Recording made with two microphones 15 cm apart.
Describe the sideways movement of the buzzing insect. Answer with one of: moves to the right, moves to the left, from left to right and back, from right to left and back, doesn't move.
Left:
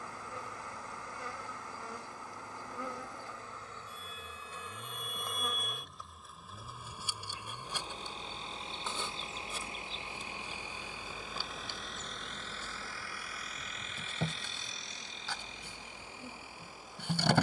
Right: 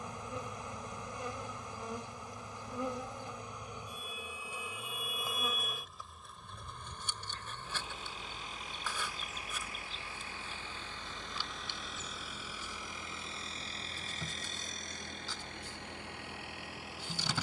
moves to the left.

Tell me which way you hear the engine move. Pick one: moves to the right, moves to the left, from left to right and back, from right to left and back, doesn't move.
moves to the right.